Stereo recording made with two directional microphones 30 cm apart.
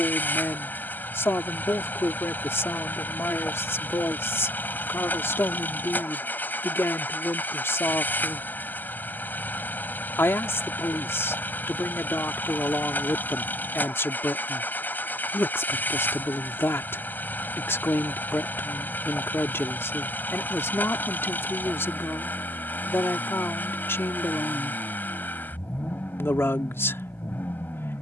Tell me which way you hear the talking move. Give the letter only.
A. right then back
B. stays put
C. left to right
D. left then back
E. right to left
B.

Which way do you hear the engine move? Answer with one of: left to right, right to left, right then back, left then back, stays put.
stays put.